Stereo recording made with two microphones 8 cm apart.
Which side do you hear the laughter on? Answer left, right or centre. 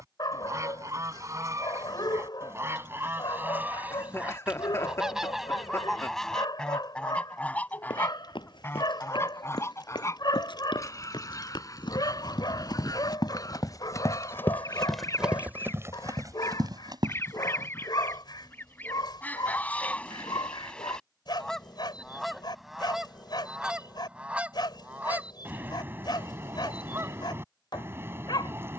left.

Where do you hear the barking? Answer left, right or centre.
left.